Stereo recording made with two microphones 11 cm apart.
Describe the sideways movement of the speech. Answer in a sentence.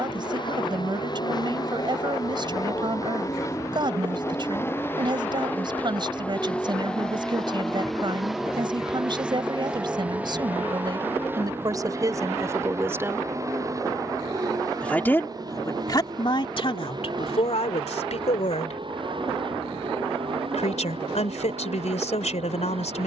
You can hear the speech move to the left.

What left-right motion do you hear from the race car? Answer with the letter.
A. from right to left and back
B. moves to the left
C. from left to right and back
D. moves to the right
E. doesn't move
D.